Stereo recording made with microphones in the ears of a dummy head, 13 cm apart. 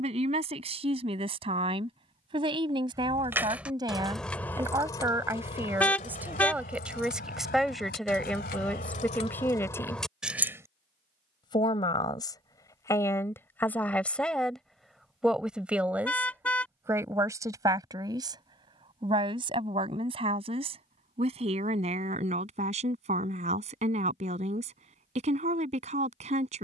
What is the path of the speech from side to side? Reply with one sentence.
You can hear the speech move from right to left and back again.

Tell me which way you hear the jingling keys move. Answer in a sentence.
In this clip you hear the jingling keys move from right to left and back again.